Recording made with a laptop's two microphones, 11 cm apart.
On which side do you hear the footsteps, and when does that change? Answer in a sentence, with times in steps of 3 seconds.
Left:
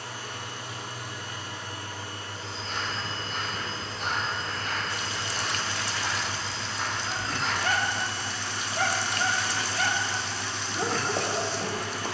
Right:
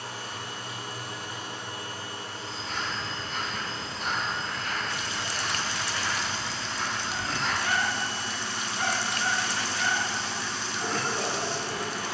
In this clip you hear the footsteps on the left from 0 s, in the centre from 6 s and on the right from 9 s.